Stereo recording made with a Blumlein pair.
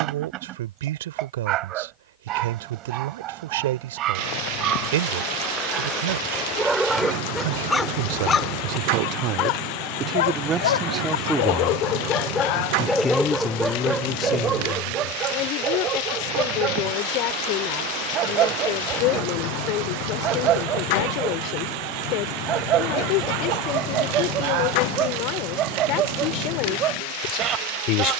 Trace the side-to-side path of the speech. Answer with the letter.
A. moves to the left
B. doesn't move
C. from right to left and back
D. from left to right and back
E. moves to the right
A.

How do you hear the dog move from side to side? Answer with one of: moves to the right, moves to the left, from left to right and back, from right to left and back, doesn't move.
from right to left and back.